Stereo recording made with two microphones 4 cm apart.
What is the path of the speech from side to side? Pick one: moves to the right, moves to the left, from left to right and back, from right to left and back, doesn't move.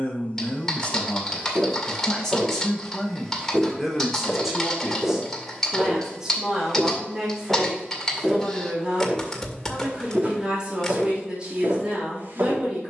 moves to the right.